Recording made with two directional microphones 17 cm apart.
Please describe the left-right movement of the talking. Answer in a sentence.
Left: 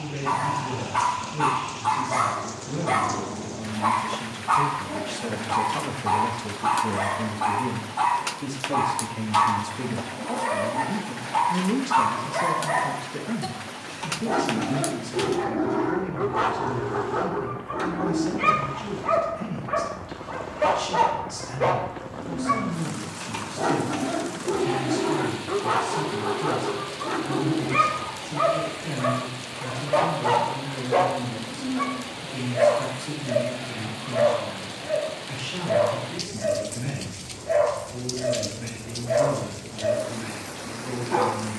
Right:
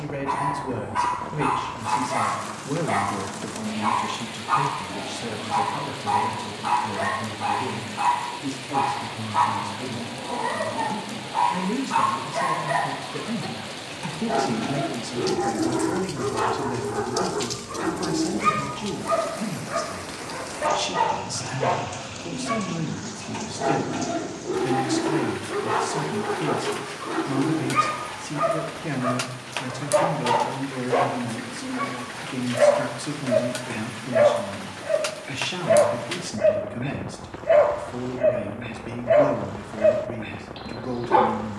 In this clip you hear the talking move from right to left and back again.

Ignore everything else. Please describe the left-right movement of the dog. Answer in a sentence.
You can hear the dog move to the right.